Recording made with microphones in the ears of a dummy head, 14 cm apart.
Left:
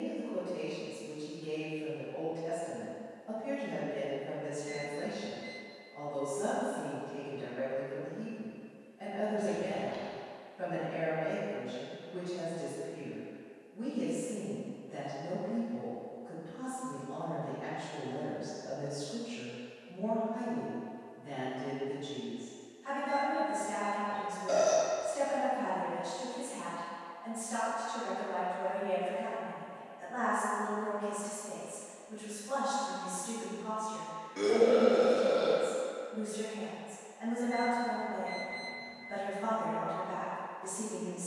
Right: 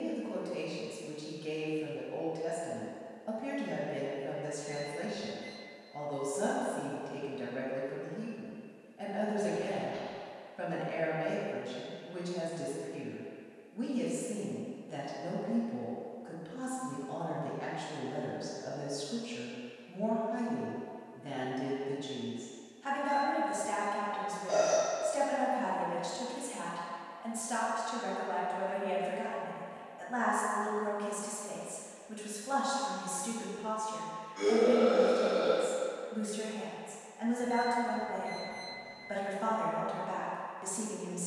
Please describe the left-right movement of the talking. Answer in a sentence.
You can hear the talking stay put.